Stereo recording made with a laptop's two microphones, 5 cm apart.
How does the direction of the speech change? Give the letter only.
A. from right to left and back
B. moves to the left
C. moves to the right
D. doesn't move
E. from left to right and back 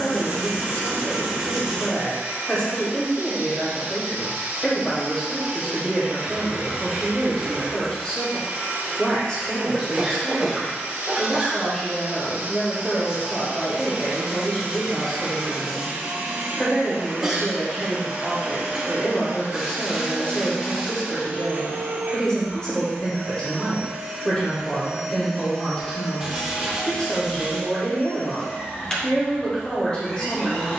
D.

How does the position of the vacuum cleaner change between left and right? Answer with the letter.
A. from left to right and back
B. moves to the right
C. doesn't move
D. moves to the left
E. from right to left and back
D.